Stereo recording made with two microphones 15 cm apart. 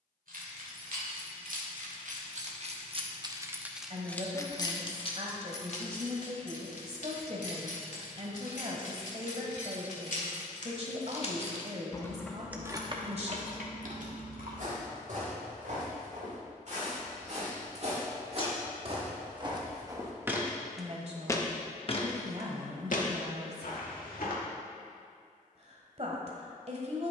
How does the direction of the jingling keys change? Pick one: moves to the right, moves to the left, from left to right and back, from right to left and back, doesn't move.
from right to left and back.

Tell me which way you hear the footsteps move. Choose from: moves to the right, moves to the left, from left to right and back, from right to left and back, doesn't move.
moves to the left.